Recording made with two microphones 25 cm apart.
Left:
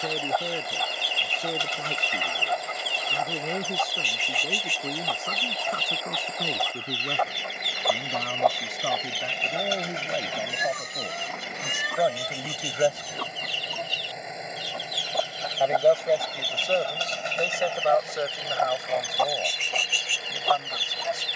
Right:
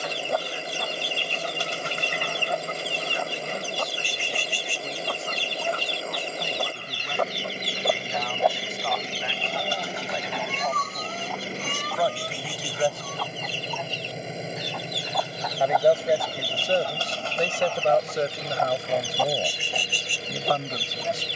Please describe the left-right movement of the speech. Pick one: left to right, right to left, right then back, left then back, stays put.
left to right.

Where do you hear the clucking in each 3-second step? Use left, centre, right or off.
right, right, right, left, left, left, centre.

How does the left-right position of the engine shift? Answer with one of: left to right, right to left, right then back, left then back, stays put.
stays put.